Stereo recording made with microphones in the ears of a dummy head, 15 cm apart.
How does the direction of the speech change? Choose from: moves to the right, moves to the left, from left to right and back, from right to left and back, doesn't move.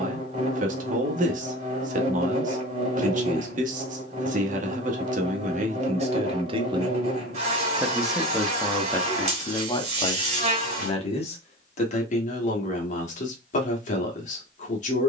moves to the left.